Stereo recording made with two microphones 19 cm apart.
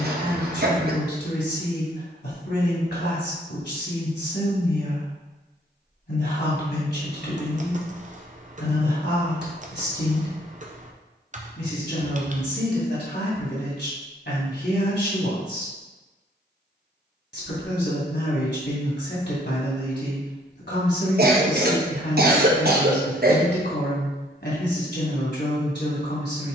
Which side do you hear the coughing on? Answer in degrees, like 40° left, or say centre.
60° right.